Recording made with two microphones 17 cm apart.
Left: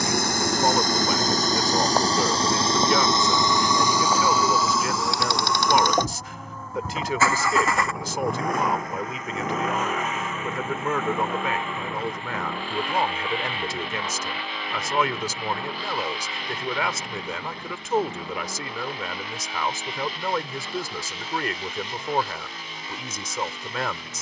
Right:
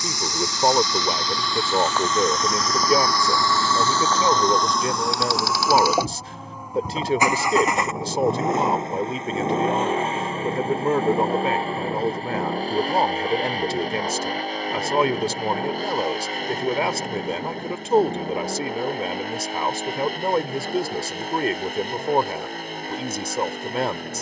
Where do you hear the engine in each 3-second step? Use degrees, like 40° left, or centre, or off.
40° left, 10° left, 20° right, 30° right, 40° right, 40° right, 50° right, 50° right.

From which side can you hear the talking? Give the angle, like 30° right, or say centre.
30° right.